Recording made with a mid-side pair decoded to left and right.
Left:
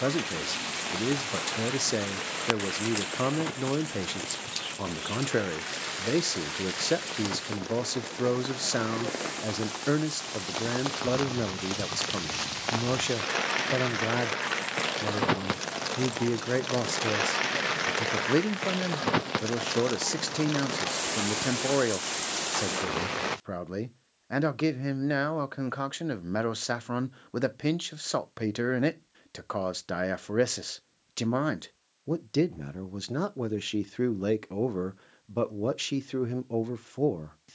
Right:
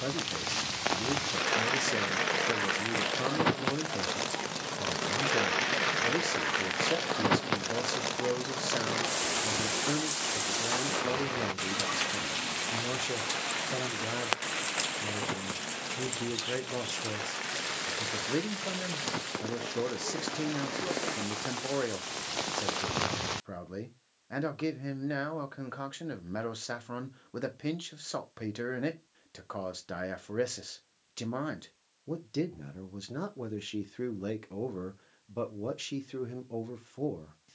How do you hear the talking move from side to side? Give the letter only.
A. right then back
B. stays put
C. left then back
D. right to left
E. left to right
B.